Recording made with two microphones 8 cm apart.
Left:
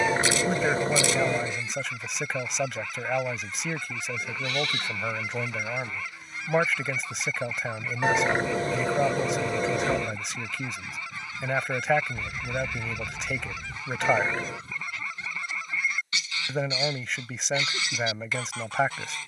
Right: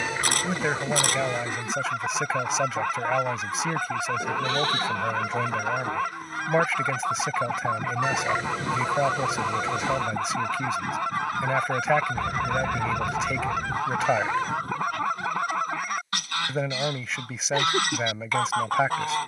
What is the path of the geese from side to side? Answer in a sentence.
In this clip you hear the geese stay put.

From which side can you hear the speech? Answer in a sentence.
You can hear the speech in the centre.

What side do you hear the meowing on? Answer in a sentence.
You can hear the meowing on the left.